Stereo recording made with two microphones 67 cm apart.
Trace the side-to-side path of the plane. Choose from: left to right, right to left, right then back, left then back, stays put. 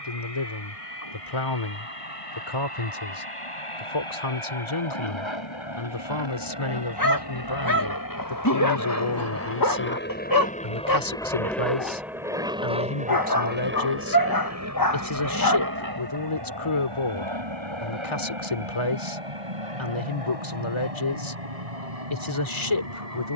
left to right.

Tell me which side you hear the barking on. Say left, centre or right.
left.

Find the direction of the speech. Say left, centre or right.
left.